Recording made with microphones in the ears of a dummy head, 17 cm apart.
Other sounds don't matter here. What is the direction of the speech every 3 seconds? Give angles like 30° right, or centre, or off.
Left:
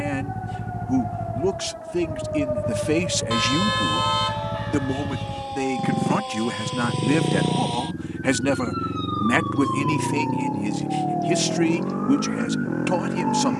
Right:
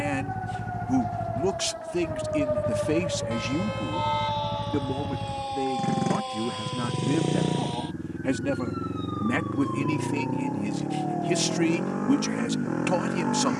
10° right, 50° left, 60° left, 10° left, 10° right.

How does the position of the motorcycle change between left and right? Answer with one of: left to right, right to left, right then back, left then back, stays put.
stays put.